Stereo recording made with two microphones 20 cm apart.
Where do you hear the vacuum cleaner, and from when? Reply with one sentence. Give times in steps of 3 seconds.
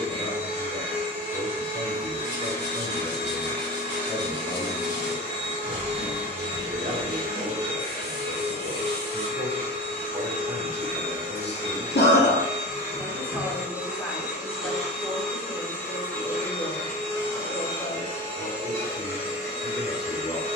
You can hear the vacuum cleaner on the right from 0 s, in the centre from 12 s and on the left from 18 s.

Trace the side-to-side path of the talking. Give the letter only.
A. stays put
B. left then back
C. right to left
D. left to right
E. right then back
E.